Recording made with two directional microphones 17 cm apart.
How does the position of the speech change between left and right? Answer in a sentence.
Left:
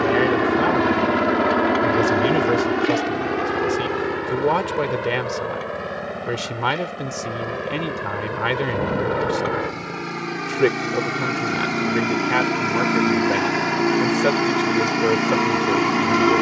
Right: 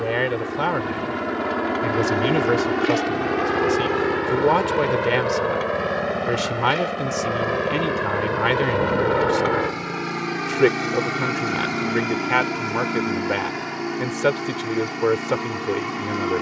You can hear the speech stay in one place.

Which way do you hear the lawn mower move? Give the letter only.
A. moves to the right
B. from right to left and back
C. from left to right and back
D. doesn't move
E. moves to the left
C.